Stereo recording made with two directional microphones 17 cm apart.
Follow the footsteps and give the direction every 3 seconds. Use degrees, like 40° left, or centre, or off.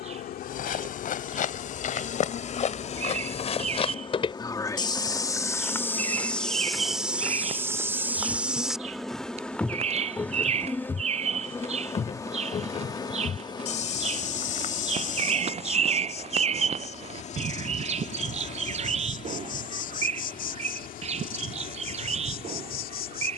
50° left, 30° left, centre, 20° left, 40° left, 50° left, off, off.